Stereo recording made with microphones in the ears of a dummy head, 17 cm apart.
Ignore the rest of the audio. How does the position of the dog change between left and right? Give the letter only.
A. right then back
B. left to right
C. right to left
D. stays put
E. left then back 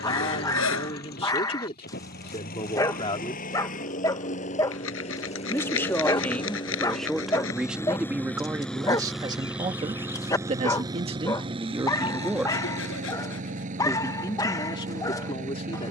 D.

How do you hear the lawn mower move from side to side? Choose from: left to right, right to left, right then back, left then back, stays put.
left to right.